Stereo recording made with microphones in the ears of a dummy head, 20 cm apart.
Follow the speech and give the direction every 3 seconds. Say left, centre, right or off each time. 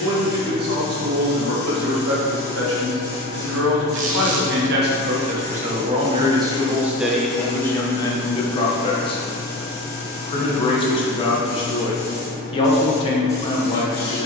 right, right, centre, left, left.